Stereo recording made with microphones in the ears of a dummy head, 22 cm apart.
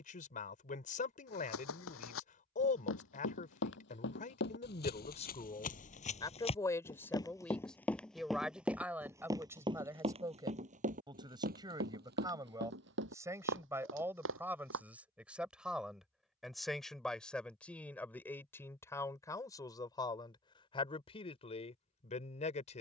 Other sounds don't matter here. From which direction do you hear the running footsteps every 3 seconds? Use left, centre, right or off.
left, left, centre, right, right, off, off, off.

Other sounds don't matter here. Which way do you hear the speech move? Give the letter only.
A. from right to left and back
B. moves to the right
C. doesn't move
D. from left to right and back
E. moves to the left
D.